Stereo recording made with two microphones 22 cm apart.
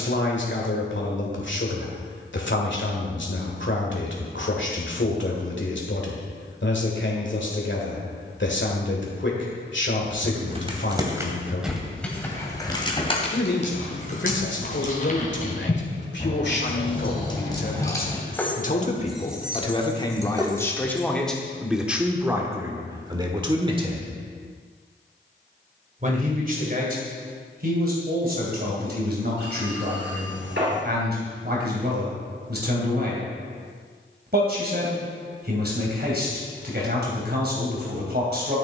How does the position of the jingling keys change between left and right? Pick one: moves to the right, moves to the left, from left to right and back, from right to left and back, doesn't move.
from right to left and back.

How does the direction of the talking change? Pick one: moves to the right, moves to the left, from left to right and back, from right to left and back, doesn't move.
moves to the right.